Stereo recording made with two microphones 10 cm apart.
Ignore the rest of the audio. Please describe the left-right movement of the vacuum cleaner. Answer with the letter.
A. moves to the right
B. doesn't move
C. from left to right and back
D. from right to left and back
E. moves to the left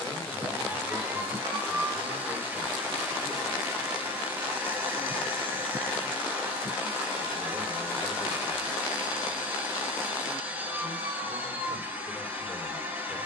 B.